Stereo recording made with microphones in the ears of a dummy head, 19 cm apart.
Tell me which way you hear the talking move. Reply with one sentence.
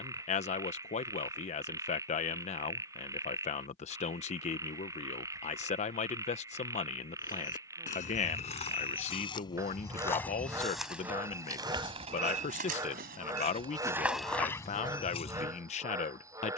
You can hear the talking stay in one place.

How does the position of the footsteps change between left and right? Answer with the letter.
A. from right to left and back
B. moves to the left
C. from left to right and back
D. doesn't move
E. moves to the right
C.